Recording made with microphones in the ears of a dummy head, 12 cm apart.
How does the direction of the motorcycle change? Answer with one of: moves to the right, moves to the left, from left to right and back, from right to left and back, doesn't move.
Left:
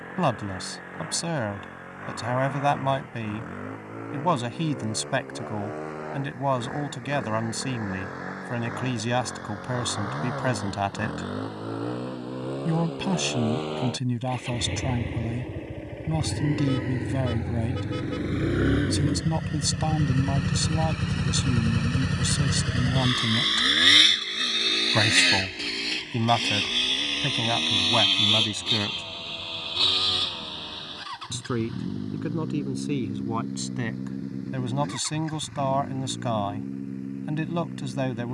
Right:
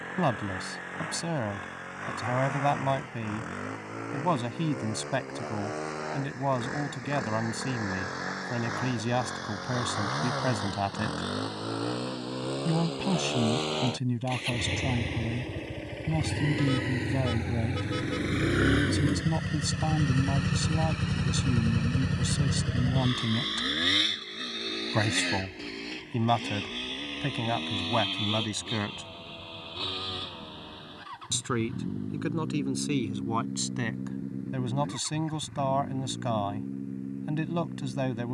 moves to the left.